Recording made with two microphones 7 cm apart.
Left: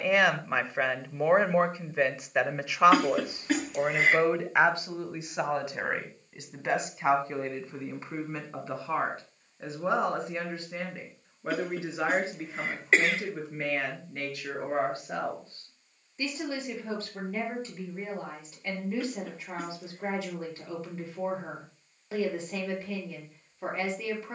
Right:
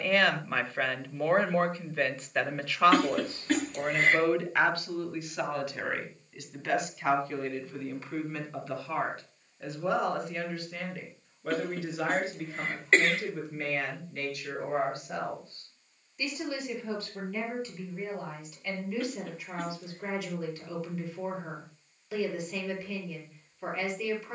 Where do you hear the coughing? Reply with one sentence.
You can hear the coughing in the centre.